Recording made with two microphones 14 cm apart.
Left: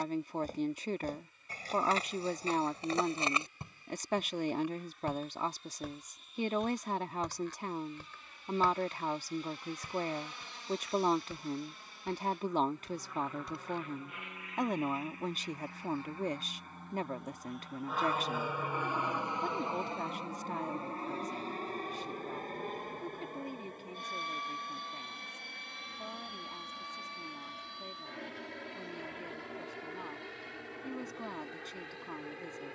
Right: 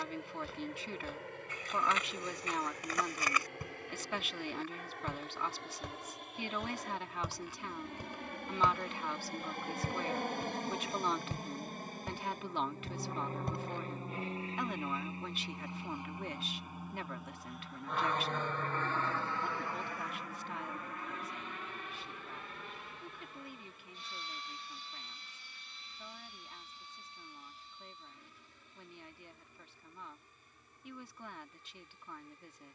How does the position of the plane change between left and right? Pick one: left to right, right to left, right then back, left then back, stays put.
right to left.